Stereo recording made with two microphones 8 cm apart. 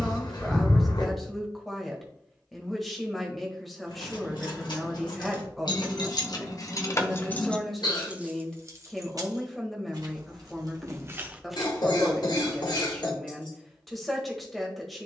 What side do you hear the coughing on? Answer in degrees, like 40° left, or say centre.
70° left.